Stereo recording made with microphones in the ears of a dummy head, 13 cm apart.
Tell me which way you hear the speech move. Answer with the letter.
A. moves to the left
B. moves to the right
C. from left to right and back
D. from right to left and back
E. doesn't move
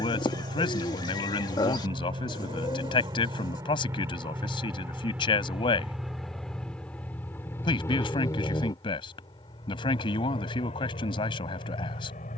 E.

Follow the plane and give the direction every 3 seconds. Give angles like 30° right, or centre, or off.
40° right, 20° right, 10° left, 40° left.